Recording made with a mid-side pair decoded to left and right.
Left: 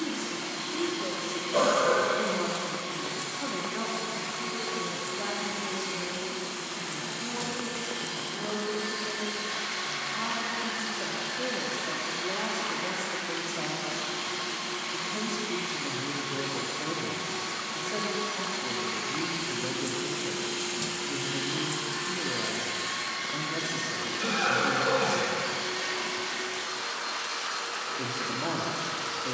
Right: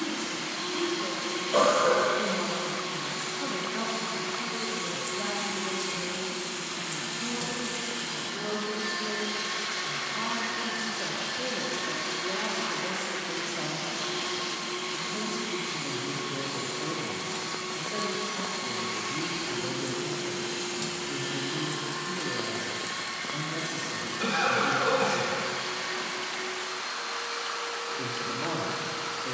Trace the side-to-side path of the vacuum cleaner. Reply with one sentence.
In this clip you hear the vacuum cleaner move from right to left.